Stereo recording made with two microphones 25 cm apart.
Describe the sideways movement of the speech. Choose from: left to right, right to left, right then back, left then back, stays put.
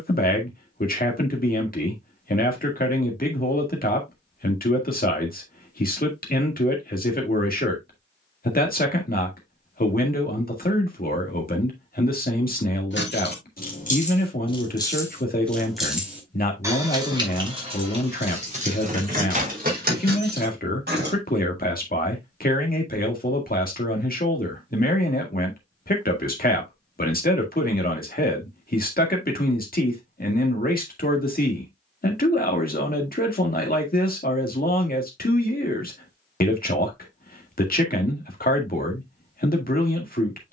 stays put.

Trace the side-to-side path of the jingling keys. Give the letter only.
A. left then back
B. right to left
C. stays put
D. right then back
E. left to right
E.